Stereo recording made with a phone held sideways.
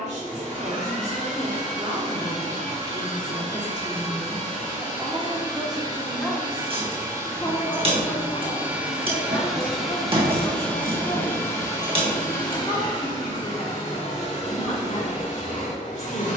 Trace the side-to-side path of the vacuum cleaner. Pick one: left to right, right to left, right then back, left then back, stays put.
right to left.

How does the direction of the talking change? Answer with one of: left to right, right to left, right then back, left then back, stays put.
right to left.